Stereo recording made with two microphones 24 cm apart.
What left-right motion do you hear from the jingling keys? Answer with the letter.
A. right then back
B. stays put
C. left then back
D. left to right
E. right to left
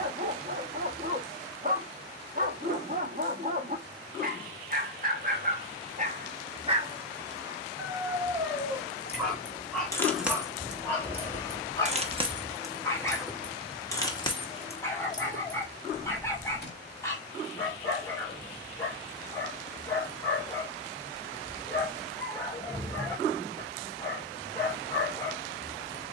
A.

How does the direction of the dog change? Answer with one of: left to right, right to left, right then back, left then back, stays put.
right to left.